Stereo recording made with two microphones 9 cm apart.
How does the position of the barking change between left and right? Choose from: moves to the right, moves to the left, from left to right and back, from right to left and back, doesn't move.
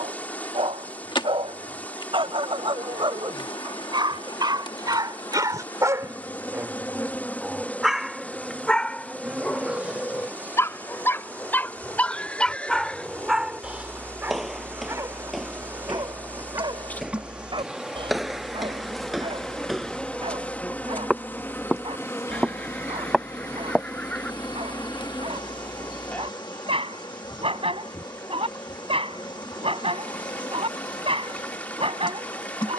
from right to left and back.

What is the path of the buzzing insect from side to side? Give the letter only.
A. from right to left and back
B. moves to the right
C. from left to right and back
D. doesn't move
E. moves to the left
C.